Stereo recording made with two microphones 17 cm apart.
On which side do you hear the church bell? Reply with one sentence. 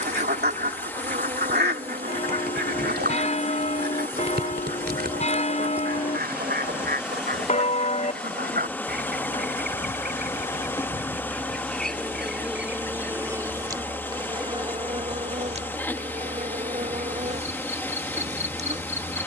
In this clip you hear the church bell on the left.